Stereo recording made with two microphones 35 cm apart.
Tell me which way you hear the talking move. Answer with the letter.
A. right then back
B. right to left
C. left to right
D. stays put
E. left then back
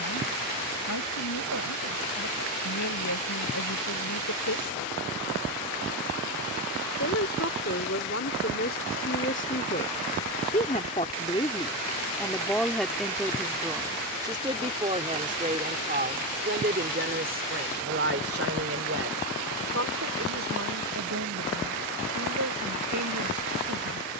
C.